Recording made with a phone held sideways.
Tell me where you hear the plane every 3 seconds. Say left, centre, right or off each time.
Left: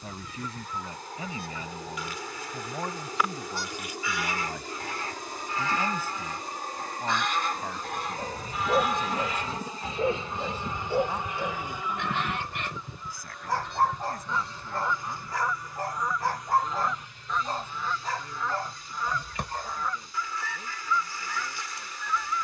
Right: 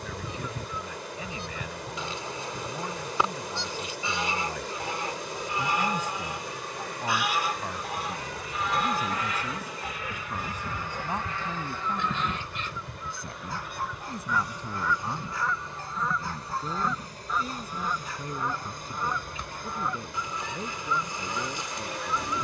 left, left, left, left, centre, right, right, right.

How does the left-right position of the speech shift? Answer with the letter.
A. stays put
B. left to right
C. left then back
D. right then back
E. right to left
B.